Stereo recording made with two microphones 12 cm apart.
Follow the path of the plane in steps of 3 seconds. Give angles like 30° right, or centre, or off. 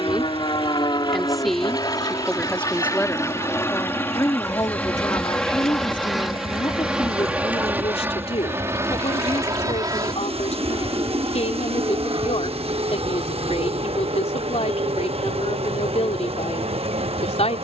40° left, 10° left, 10° right, 30° right, 50° right, 50° right.